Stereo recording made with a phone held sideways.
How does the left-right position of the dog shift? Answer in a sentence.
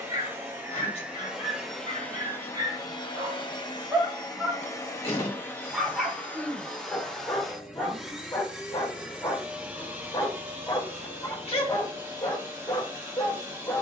You can hear the dog move from right to left.